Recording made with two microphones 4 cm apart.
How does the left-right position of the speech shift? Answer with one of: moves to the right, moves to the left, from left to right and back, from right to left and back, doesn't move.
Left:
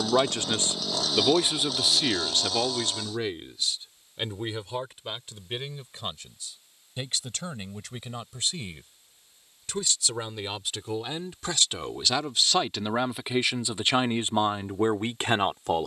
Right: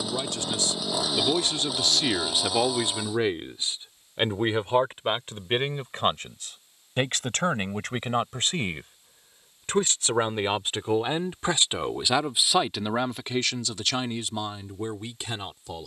from left to right and back.